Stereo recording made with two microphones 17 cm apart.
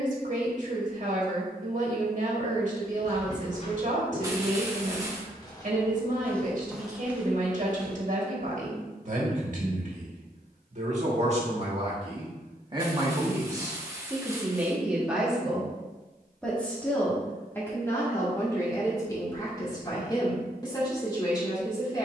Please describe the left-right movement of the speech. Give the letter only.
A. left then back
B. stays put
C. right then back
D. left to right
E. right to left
E.